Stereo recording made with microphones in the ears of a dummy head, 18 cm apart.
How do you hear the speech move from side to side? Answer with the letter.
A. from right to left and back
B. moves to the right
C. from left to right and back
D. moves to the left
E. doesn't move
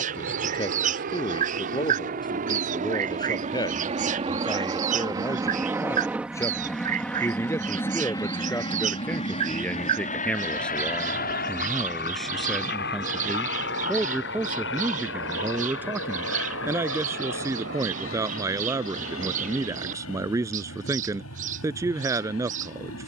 B.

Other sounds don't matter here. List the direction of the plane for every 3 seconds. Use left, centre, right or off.
right, right, centre, left, left, left, left, left.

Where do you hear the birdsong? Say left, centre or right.
right.